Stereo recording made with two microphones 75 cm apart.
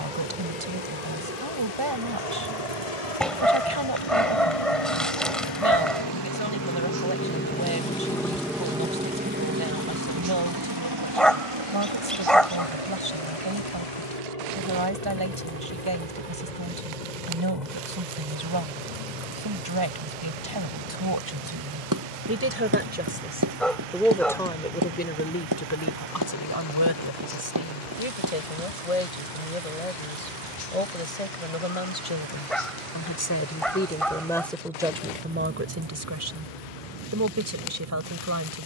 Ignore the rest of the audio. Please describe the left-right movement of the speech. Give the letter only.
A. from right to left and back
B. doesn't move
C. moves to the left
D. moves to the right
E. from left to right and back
A.